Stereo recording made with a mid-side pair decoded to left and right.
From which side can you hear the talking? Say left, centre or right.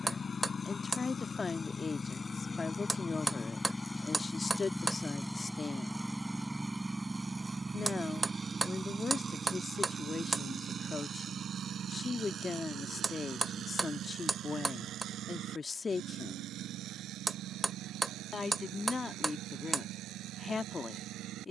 left.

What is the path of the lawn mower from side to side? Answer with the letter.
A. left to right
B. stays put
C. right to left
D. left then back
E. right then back
A.